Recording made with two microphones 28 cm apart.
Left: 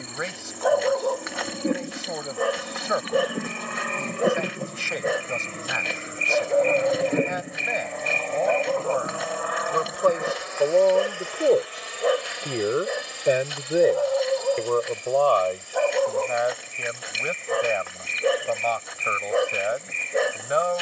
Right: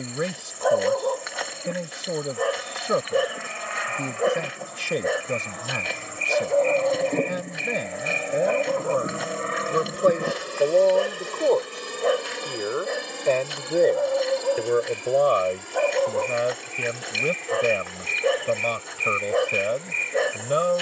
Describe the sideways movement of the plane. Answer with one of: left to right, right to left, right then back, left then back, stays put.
left to right.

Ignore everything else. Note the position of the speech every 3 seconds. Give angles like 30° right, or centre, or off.
40° right, 40° right, 40° right, 10° right, 10° left, 30° right, 40° right.